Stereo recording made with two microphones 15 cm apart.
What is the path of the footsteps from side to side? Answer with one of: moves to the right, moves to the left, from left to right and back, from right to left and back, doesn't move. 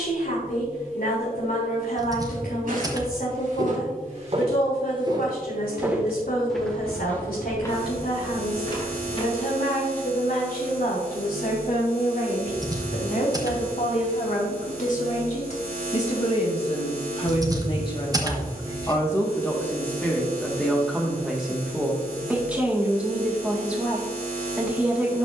moves to the left.